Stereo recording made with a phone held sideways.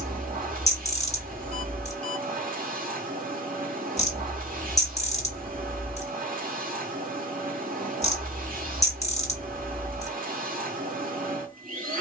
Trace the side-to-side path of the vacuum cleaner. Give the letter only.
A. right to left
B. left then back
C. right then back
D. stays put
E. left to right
D.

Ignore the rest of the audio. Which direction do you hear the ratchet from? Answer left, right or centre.
left.